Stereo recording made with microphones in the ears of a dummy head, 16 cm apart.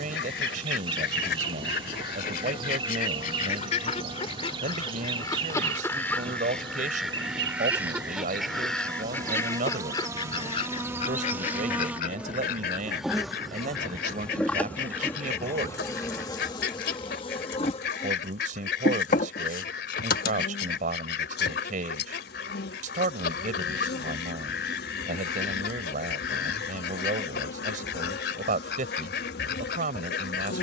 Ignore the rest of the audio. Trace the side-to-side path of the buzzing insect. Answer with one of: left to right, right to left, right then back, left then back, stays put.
right to left.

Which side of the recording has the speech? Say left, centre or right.
right.